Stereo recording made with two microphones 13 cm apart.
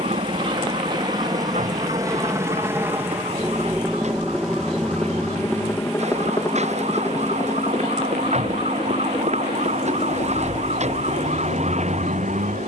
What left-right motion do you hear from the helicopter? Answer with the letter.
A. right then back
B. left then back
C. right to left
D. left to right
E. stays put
C.